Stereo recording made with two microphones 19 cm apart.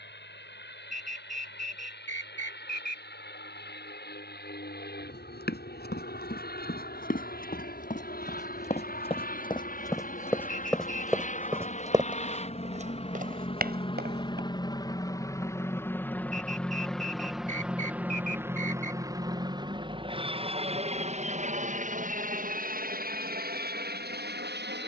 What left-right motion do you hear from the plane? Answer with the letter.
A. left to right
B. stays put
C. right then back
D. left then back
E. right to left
A.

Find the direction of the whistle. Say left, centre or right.
right.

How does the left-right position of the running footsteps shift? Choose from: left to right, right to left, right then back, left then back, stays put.
left to right.